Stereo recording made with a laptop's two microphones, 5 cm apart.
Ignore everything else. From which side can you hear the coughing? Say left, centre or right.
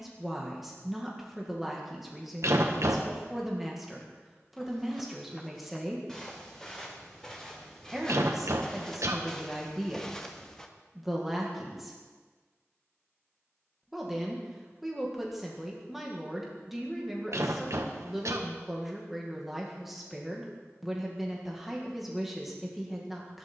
right.